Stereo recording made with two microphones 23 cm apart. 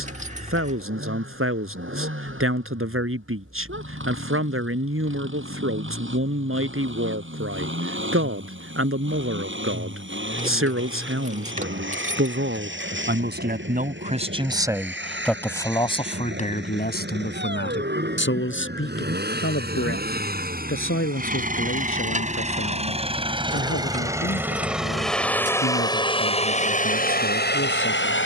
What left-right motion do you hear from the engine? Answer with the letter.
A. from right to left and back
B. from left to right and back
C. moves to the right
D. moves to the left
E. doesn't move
D.